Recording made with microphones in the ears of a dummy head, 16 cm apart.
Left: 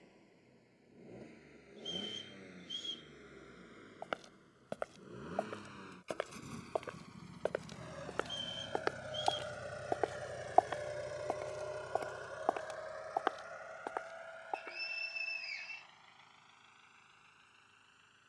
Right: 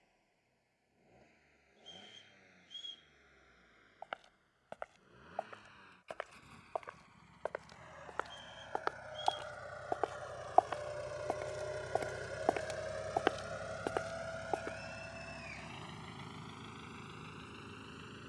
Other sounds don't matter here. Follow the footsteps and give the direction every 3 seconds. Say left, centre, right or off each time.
off, left, left, centre, right, off.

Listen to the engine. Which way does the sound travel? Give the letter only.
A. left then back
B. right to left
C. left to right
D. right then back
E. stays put
C.